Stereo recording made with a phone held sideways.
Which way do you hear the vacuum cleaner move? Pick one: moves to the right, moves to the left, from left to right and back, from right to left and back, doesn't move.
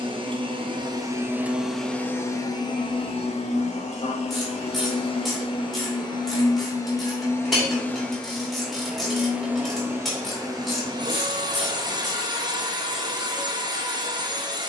from right to left and back.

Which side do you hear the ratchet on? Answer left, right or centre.
centre.